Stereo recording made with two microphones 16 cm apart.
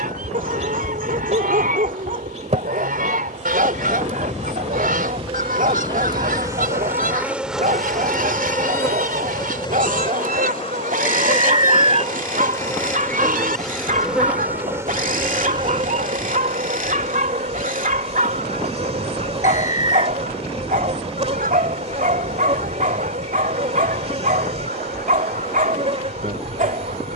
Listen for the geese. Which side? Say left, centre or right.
right.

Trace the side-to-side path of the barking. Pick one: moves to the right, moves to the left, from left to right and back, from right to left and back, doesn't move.
doesn't move.